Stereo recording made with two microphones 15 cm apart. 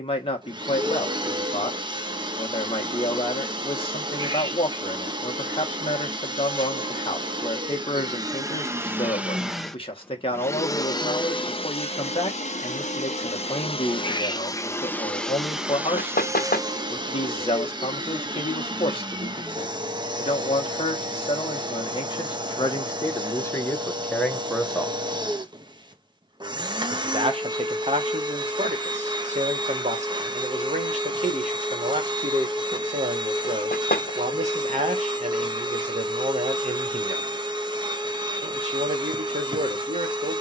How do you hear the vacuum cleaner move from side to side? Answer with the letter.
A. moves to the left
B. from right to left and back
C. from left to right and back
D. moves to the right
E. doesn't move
B.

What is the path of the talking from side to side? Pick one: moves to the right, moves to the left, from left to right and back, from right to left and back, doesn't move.
moves to the right.